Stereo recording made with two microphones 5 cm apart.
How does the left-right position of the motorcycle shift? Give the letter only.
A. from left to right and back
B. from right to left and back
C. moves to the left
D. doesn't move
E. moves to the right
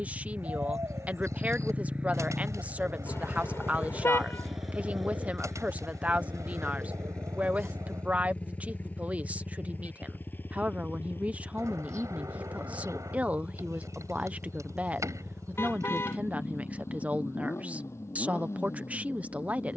C.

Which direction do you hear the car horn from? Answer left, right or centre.
left.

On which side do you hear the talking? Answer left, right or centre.
right.